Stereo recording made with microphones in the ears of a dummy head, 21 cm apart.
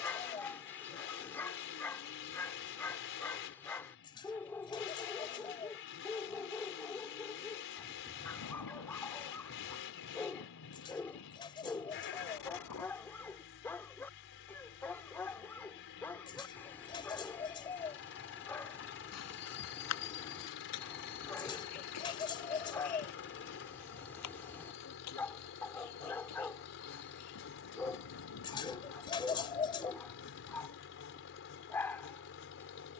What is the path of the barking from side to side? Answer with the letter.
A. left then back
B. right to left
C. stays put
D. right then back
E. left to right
C.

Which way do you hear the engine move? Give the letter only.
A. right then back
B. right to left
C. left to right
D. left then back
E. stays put
E.